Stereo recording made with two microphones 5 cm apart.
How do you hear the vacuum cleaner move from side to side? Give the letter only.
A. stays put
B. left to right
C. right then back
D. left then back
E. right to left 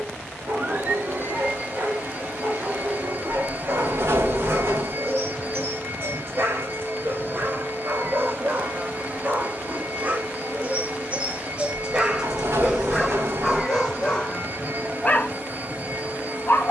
A.